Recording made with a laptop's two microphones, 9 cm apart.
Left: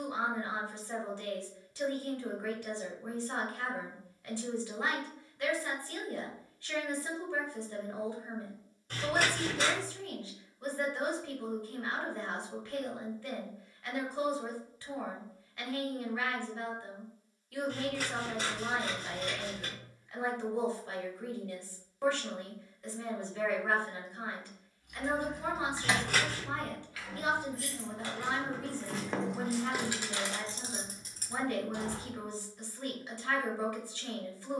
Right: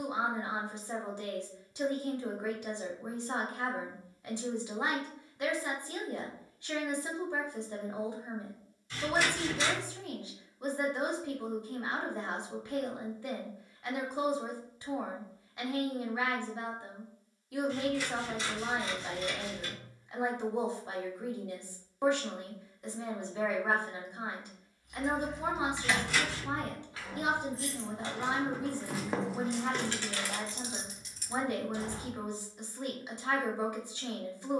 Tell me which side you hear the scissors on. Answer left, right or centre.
left.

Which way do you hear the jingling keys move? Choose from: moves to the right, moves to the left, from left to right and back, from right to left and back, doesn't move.
from left to right and back.